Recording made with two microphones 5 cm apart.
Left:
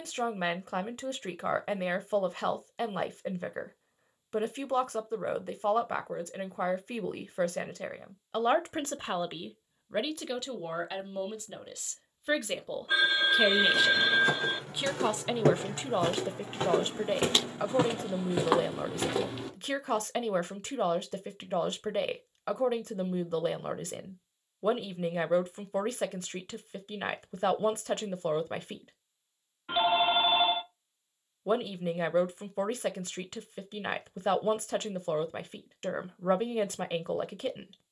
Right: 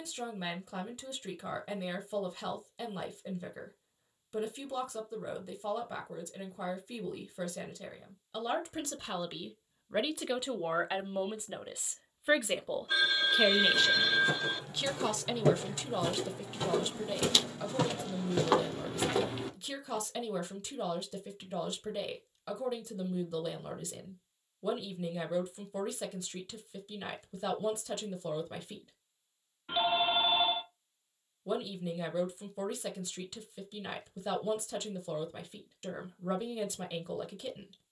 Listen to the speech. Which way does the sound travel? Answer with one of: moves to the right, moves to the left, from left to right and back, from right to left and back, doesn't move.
from left to right and back.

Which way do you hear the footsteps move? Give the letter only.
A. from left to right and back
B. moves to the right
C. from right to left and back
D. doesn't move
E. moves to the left
B.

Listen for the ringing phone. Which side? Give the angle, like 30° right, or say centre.
20° left.